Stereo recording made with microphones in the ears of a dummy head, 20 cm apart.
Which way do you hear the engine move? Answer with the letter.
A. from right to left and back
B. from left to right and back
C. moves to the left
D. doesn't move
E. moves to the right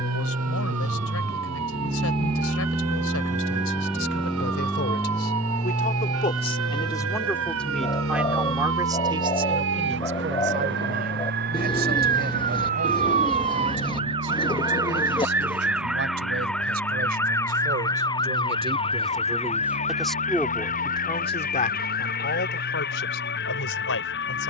C.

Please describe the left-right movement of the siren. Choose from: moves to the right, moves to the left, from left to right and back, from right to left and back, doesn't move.
moves to the left.